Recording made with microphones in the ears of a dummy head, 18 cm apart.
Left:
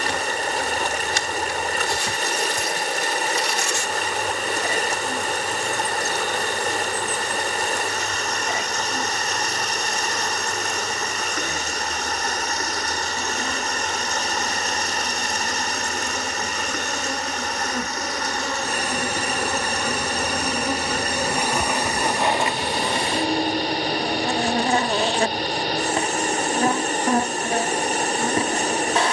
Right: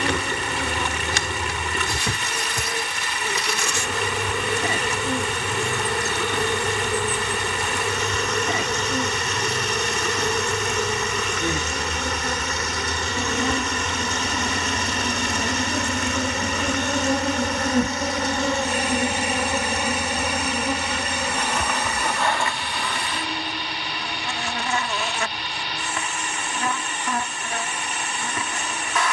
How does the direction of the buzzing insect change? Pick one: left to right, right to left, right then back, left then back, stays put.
right to left.